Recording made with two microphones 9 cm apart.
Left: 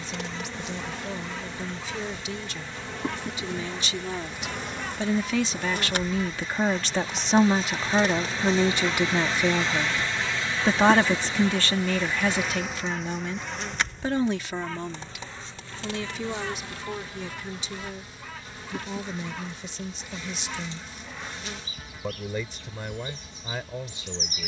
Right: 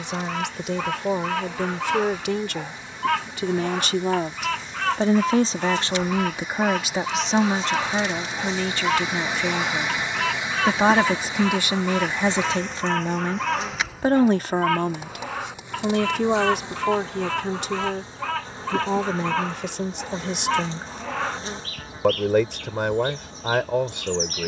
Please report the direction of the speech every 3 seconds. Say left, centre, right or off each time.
right, right, centre, centre, right, right, right, right.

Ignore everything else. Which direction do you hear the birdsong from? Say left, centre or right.
right.